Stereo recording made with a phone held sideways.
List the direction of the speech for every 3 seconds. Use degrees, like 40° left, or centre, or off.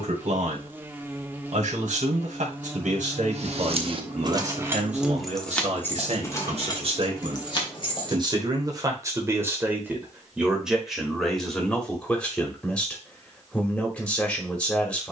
80° right, 70° right, 40° right, 10° right, 10° left.